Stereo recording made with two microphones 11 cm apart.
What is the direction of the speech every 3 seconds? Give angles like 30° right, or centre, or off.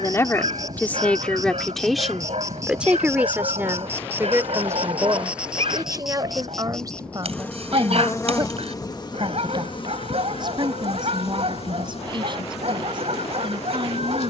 10° left, 20° right, 40° right, 50° right, 50° right.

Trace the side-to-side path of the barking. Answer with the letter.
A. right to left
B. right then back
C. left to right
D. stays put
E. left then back
D.